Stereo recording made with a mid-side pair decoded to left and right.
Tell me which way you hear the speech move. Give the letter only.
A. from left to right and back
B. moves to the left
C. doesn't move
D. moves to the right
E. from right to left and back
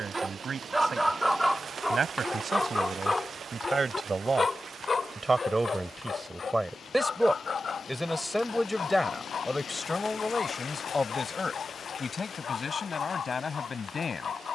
B.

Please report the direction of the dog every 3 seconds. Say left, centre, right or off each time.
centre, left, left, left, left.